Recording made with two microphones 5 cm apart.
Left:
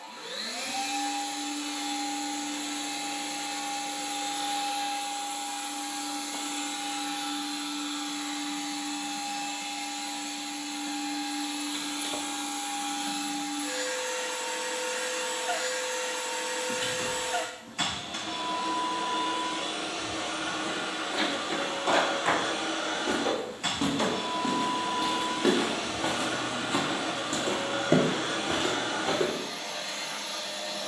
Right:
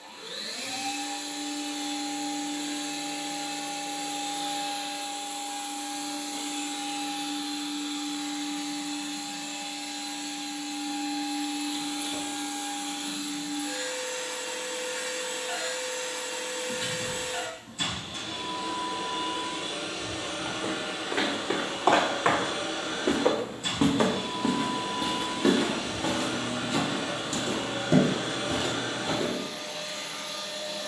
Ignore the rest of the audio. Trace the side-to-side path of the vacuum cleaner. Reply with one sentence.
In this clip you hear the vacuum cleaner stay put.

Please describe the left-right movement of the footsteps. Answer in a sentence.
In this clip you hear the footsteps move to the left.